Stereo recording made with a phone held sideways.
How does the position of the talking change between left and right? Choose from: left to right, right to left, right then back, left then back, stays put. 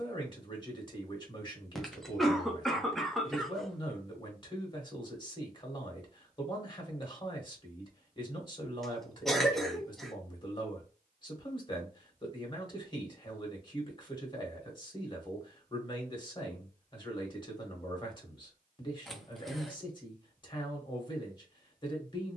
stays put.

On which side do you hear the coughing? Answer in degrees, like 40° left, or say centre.
centre.